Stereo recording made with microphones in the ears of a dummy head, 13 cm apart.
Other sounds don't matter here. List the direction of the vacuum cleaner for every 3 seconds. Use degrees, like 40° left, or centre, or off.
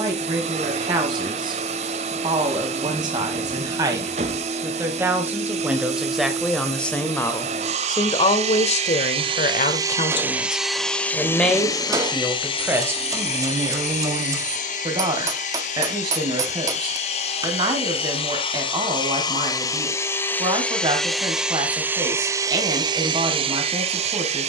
50° right, 50° right, 50° right, 10° right, 50° left, 50° left, 20° left, 20° right.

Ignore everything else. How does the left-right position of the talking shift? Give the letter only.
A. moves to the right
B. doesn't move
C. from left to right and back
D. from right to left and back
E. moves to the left
D.